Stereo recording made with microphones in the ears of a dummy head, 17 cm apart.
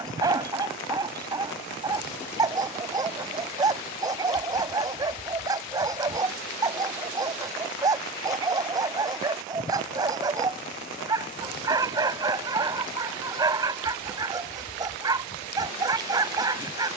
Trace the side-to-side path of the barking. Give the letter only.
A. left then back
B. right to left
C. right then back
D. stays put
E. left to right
D.